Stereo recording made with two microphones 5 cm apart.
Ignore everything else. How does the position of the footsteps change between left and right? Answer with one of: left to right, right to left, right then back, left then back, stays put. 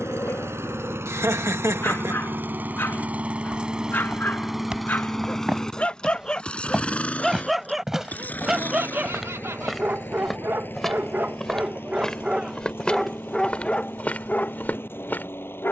right to left.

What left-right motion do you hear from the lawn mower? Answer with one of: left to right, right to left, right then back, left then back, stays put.
right to left.